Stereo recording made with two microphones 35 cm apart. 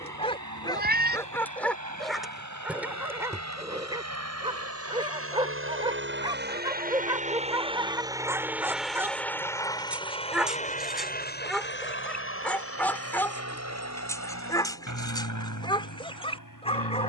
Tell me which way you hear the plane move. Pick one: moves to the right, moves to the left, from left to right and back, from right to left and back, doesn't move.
moves to the left.